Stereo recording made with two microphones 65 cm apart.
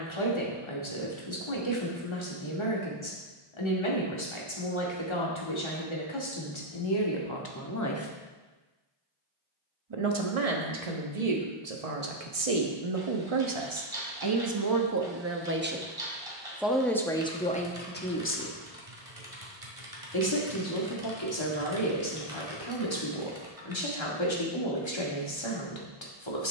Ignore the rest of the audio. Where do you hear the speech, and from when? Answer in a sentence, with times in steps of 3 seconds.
In this clip you hear the speech on the left from 0 s, on the right from 9 s, in the centre from 15 s and on the left from 18 s.